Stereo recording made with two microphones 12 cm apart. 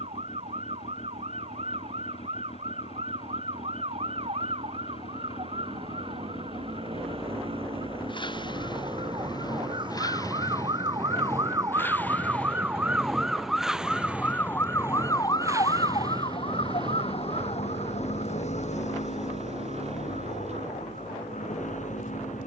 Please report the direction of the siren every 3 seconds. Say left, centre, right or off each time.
right, right, right, right, centre, left, left, left.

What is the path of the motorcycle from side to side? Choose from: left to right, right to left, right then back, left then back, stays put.
left to right.